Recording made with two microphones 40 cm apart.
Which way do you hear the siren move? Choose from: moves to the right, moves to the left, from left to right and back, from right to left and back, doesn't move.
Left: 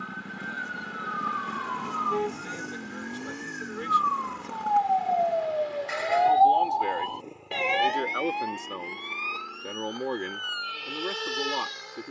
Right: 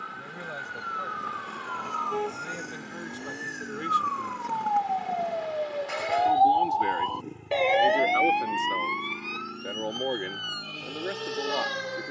moves to the right.